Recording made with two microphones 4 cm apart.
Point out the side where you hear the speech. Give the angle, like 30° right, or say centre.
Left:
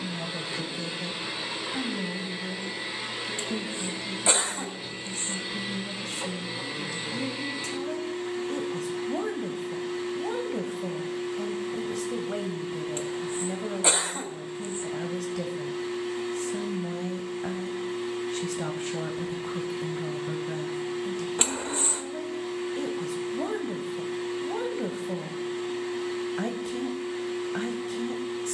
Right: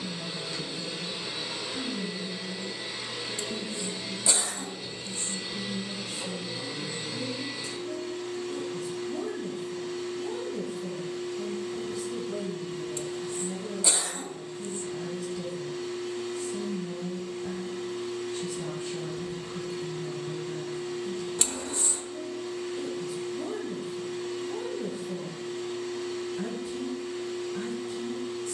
70° left.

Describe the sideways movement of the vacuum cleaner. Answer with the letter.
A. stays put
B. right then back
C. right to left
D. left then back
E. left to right
A.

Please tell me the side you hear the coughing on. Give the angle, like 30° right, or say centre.
40° left.